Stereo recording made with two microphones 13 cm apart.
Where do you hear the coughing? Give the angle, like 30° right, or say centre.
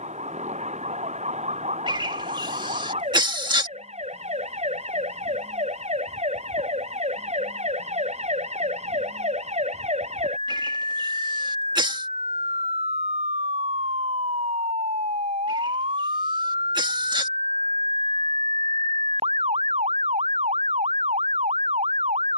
40° right.